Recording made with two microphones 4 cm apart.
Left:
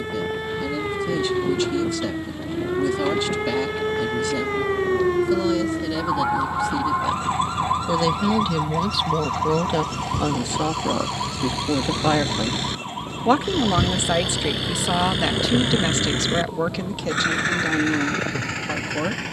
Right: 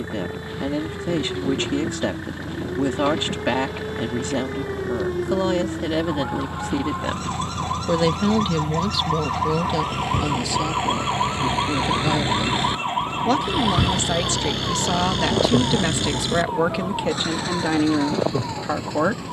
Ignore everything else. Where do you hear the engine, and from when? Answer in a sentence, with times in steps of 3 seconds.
In this clip you hear the engine on the right from 0 s, in the centre from 12 s and on the left from 15 s.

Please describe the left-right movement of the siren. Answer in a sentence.
In this clip you hear the siren move to the right.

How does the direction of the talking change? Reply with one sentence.
You can hear the talking go left and come back.